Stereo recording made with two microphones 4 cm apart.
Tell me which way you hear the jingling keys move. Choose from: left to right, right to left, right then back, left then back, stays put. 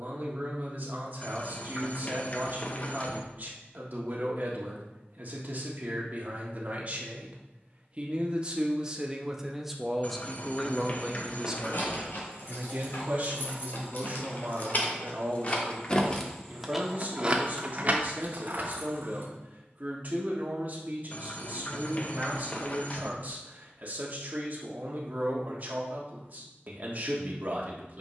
left to right.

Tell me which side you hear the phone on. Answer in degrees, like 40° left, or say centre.
40° left.